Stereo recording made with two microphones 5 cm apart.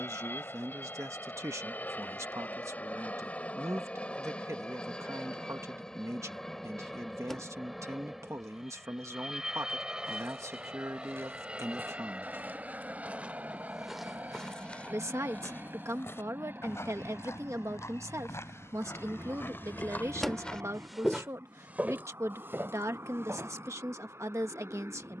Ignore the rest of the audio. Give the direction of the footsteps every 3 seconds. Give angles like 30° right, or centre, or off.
off, off, off, 60° right, 10° right, 60° left, 40° left, 40° right, off.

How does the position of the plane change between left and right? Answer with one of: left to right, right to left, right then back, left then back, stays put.
left to right.